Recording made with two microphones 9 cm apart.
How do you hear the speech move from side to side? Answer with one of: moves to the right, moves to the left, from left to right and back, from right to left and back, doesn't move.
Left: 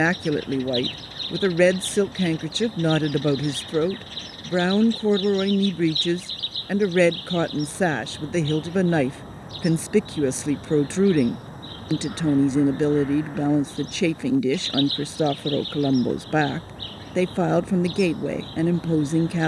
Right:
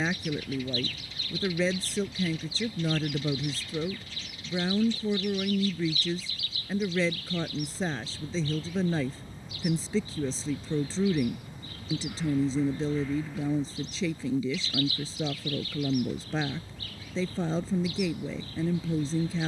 doesn't move.